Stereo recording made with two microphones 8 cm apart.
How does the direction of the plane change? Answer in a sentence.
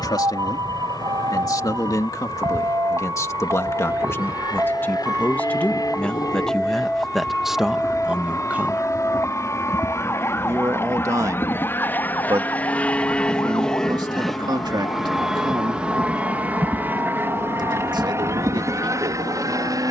In this clip you hear the plane travel towards the right.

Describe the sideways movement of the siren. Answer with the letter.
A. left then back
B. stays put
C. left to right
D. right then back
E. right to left
E.